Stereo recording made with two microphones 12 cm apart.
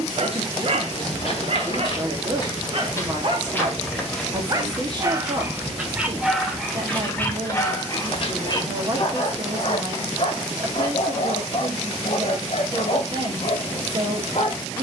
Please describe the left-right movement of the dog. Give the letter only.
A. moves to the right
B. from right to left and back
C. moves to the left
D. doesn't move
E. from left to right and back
C.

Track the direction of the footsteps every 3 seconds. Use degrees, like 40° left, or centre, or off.
40° left, centre, 20° left, off, off.